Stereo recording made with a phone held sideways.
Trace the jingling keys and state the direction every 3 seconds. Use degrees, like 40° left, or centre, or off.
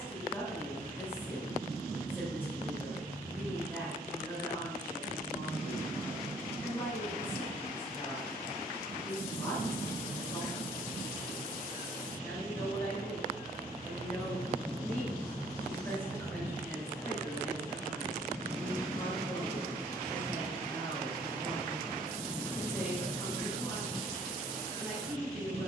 off, off, off, 70° left, 50° left, 20° left, centre, 30° left, 70° left.